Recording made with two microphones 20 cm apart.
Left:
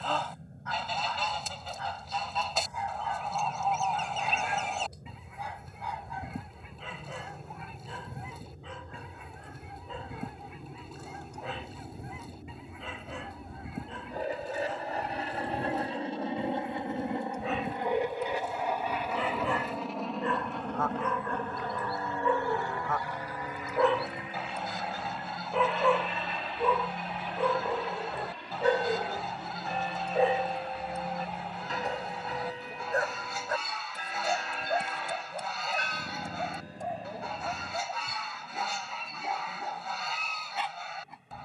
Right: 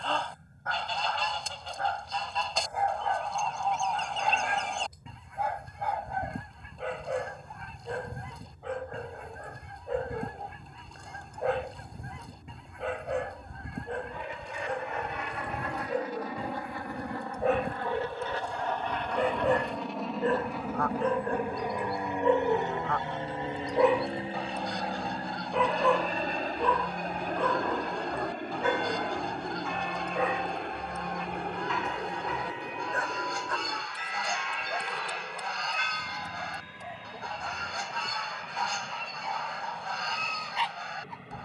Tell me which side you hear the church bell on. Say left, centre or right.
left.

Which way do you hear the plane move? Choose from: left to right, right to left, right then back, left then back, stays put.
left to right.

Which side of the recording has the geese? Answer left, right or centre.
centre.